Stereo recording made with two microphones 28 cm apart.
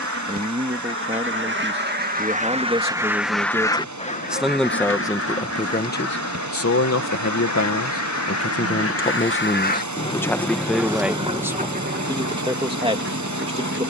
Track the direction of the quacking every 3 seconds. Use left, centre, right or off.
right, left, left, centre, right.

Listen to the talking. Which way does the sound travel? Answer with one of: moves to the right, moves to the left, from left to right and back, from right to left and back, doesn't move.
from right to left and back.